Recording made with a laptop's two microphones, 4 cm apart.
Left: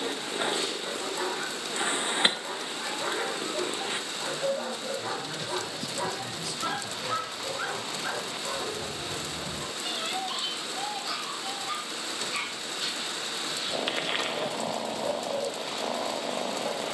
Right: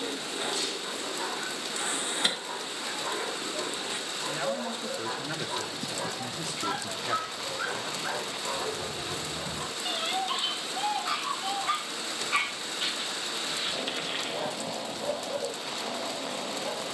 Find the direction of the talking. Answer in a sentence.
You can hear the talking on the right.